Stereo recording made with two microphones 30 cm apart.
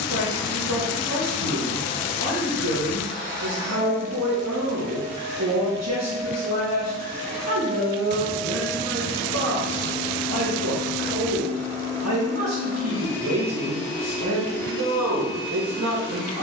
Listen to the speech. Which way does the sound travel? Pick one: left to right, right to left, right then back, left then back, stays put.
stays put.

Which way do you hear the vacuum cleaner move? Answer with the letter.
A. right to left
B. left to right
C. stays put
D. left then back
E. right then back
E.